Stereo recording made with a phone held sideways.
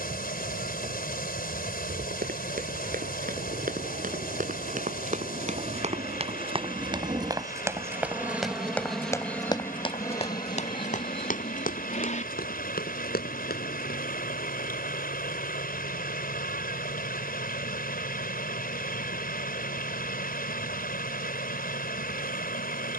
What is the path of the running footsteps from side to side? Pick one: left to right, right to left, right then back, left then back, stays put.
right to left.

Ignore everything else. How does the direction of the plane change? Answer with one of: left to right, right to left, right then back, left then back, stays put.
right to left.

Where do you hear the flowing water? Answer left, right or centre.
left.